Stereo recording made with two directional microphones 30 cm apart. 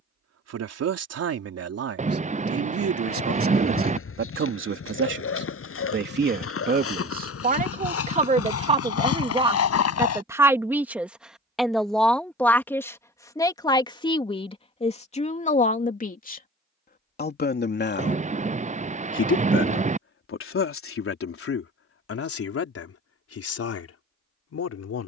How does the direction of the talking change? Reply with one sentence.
You can hear the talking move from right to left.